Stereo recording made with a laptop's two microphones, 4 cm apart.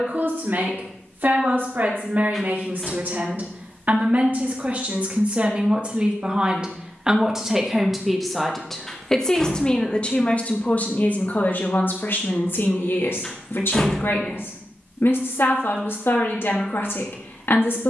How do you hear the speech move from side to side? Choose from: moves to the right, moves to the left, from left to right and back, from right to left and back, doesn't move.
moves to the left.